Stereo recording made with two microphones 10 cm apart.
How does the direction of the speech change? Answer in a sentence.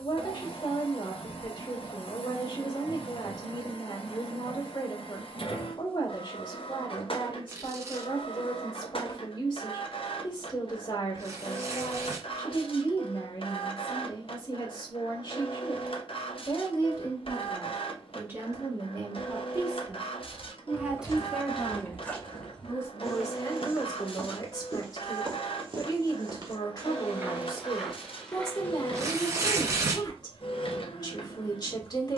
You can hear the speech go right and come back.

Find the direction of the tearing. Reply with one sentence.
You can hear the tearing on the right.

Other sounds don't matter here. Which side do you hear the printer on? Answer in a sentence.
You can hear the printer on the left.